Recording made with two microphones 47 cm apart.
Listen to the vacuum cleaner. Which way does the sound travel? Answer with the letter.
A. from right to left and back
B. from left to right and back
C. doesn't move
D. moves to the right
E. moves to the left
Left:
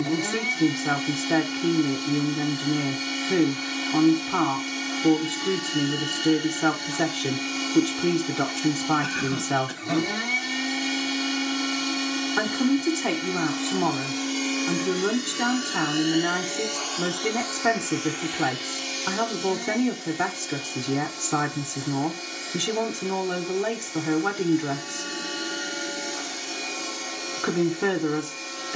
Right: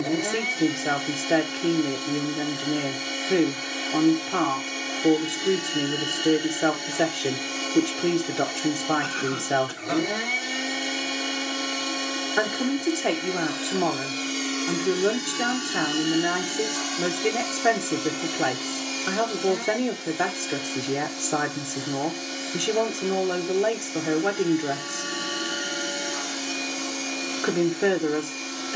D.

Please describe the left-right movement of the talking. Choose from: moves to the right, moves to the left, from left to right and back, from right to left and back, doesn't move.
doesn't move.